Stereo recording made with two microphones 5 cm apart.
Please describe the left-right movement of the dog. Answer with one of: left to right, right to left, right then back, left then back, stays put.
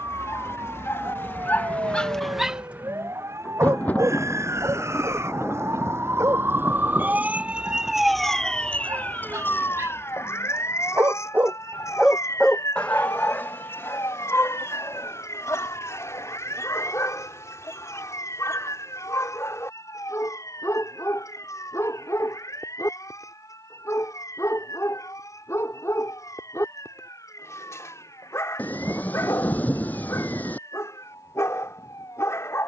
right then back.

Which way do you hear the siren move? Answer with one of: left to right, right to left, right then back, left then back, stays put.
right to left.